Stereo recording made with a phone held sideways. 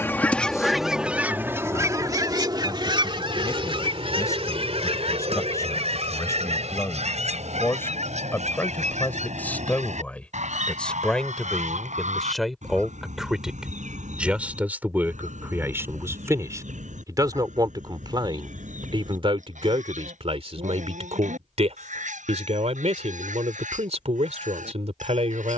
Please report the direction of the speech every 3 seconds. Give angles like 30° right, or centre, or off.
20° left, 20° left, 20° left, 10° left, centre, 20° right, 40° right, 50° right, 50° right.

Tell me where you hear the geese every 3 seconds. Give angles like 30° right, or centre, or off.
10° right, 50° right, 60° right, 60° right, 70° right, 70° right, 70° right, 70° right, 70° right.